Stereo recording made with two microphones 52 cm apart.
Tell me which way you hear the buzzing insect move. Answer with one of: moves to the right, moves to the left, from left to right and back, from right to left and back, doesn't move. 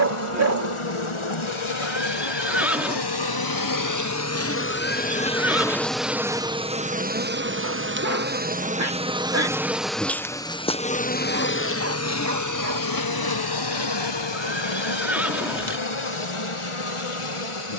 from left to right and back.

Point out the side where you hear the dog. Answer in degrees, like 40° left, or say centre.
30° right.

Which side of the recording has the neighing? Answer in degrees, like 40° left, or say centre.
centre.